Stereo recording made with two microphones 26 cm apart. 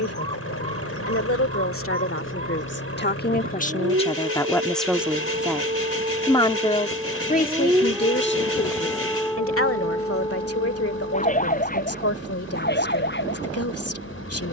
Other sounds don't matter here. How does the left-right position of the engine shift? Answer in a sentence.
You can hear the engine stay put.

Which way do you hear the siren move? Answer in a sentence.
In this clip you hear the siren move from right to left.